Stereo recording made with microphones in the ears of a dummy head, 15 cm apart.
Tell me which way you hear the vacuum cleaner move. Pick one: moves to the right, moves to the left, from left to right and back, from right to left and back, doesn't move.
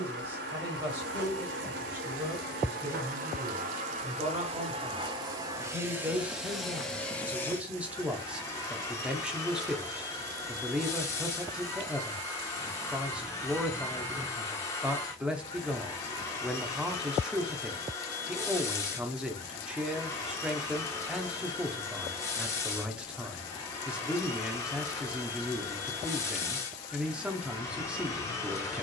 moves to the left.